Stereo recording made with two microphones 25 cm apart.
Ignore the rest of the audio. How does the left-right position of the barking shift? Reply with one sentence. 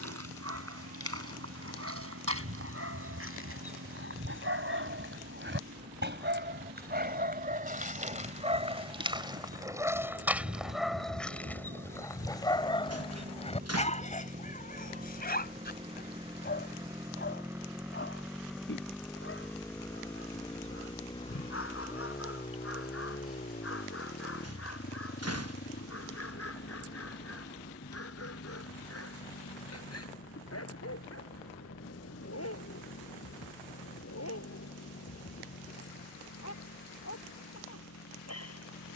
In this clip you hear the barking go from the right side to the left.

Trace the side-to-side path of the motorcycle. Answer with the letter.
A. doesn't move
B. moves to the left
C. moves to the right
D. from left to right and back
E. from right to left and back
B.